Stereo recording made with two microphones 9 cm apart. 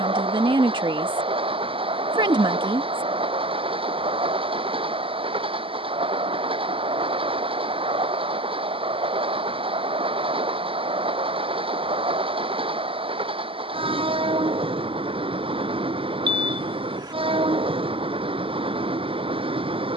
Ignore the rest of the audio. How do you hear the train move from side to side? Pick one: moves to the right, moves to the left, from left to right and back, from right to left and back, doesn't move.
doesn't move.